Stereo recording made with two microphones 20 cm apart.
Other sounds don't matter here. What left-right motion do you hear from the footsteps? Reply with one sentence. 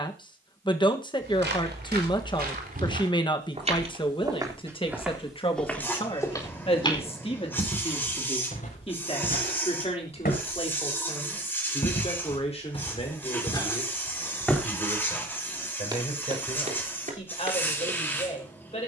You can hear the footsteps move from right to left and back again.